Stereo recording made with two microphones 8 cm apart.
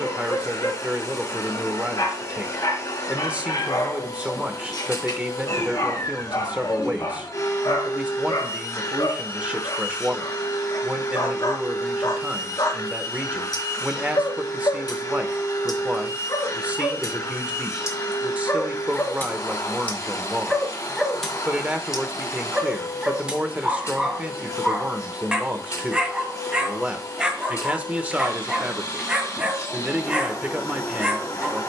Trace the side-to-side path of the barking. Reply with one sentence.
In this clip you hear the barking travel towards the right.